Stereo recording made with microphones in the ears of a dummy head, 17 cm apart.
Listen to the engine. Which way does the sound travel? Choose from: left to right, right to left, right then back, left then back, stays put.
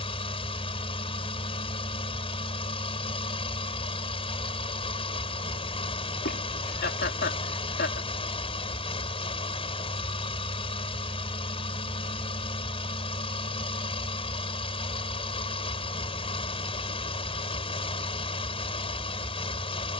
stays put.